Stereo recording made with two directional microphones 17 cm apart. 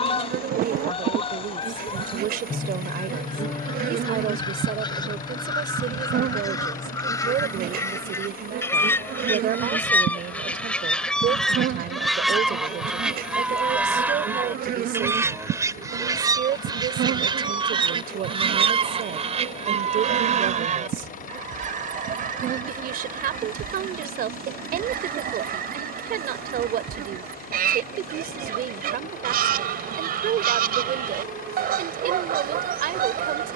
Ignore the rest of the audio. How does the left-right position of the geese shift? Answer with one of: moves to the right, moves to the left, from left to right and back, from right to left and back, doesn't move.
moves to the right.